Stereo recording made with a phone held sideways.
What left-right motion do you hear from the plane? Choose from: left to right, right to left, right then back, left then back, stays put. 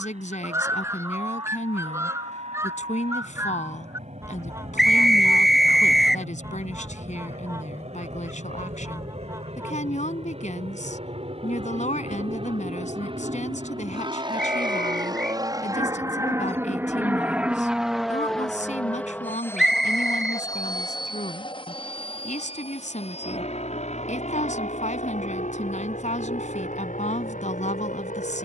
right to left.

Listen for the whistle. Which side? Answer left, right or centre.
centre.